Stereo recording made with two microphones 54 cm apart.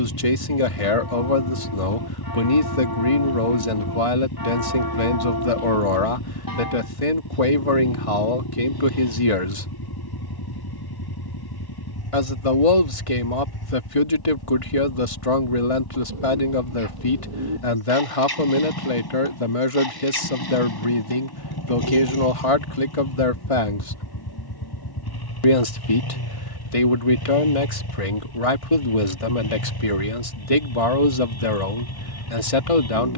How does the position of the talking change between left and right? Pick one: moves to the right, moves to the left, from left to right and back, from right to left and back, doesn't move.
doesn't move.